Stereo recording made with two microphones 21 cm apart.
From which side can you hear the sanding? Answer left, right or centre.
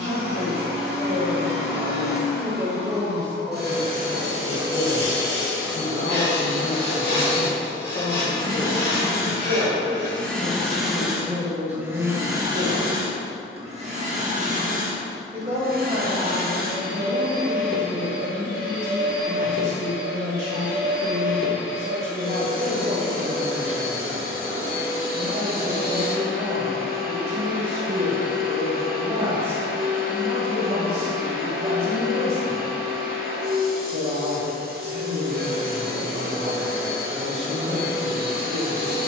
left.